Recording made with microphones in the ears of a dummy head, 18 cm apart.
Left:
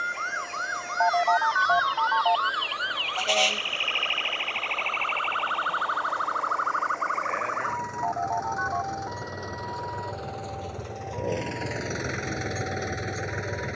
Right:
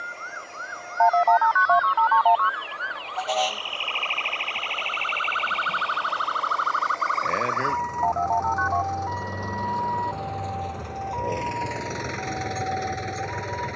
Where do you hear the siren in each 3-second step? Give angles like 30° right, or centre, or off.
70° left, centre, 50° right, 60° right, 70° right.